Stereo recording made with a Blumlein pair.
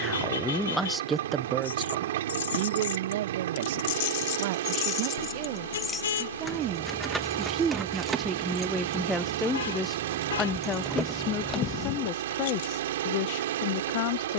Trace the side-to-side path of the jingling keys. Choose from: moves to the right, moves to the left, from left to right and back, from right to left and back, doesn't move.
from left to right and back.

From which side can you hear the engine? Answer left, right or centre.
right.